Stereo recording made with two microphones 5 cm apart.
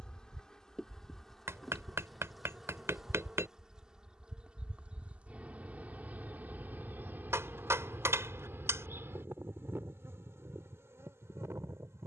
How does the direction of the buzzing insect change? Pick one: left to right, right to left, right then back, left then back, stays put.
left to right.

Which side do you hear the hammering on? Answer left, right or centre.
right.